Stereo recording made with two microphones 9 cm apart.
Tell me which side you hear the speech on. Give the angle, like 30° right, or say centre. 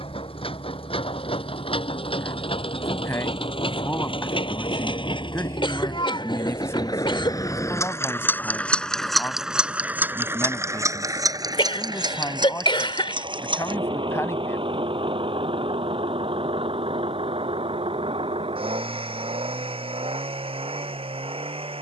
30° left.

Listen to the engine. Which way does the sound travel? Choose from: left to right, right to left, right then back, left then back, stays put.
left to right.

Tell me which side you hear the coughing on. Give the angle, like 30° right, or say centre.
60° left.